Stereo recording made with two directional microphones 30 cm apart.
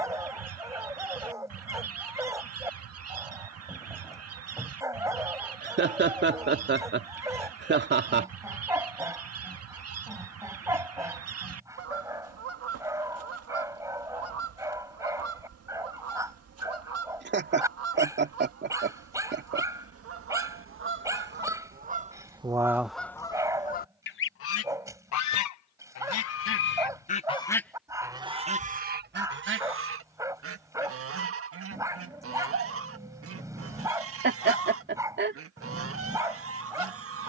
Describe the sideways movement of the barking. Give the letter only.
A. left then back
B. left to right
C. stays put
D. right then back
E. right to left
C.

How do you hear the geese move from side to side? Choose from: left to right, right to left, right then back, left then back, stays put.
left then back.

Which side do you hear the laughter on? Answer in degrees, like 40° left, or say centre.
40° right.